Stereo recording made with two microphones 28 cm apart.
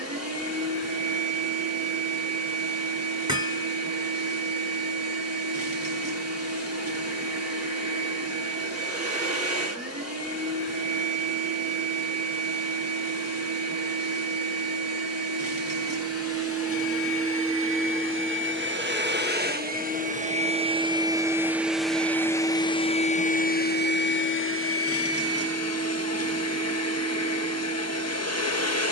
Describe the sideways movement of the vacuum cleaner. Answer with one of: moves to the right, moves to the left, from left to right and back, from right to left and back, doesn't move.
moves to the left.